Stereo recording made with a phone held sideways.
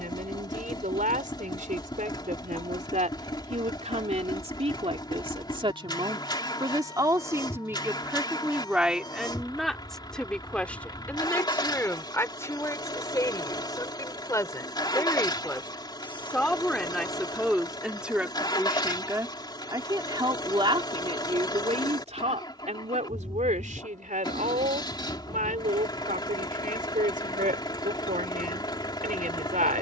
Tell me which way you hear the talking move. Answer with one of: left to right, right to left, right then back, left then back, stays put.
left then back.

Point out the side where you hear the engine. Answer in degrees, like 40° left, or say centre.
30° left.